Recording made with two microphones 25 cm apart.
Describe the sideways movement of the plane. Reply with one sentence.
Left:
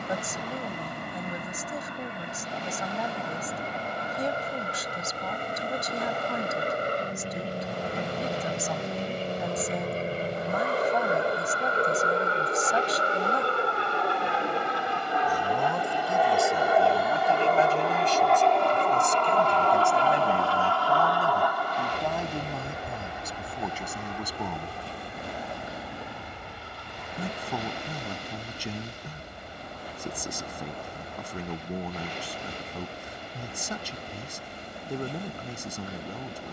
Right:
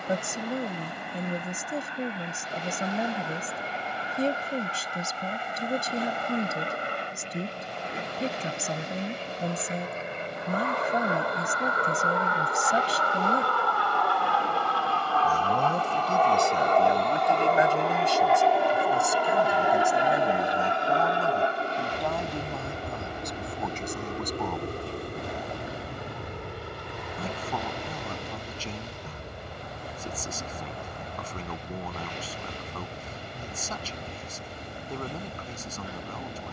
In this clip you hear the plane go from the left side to the right.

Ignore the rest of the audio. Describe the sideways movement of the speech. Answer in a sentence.
You can hear the speech move to the left.